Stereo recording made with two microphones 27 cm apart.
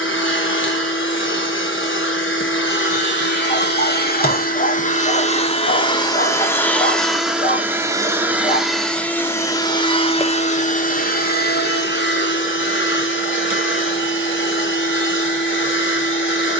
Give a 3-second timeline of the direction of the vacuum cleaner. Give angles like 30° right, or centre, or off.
50° left, 30° left, centre, 30° left, 50° left, 50° left.